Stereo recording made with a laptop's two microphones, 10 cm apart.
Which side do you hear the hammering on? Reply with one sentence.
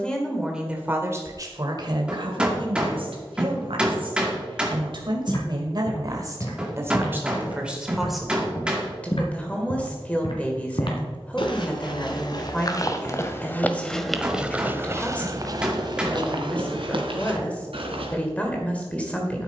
In this clip you hear the hammering in the centre.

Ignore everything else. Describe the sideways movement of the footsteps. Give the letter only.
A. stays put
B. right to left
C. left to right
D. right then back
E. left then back
C.